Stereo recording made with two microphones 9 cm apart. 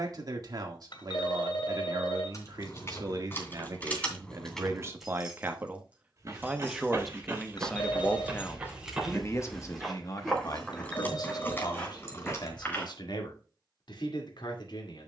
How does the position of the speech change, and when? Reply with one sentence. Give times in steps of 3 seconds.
In this clip you hear the speech on the right from 0 s, in the centre from 6 s and on the left from 9 s.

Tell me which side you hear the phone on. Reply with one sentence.
In this clip you hear the phone on the left.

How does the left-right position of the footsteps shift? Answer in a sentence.
In this clip you hear the footsteps go from the right side to the left.